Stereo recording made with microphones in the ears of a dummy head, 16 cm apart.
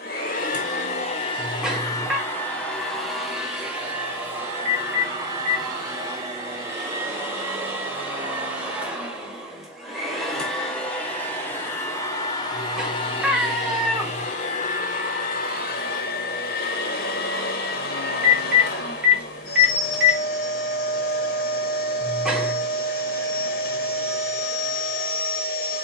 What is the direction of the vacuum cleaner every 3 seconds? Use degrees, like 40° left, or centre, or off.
30° left, 10° right, 10° right, centre, 30° left, 50° left, 50° left, 50° left, 50° left.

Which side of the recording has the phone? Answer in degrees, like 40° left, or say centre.
10° right.